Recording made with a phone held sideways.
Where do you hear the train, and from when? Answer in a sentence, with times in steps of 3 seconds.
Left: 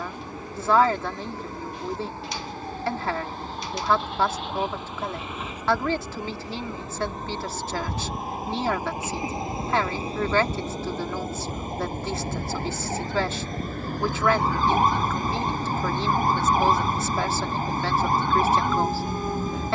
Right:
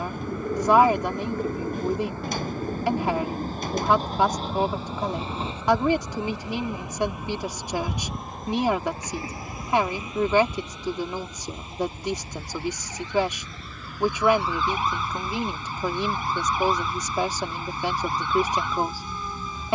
In this clip you hear the train on the right from 0 s, in the centre from 6 s and on the left from 9 s.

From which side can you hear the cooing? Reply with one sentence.
In this clip you hear the cooing on the right.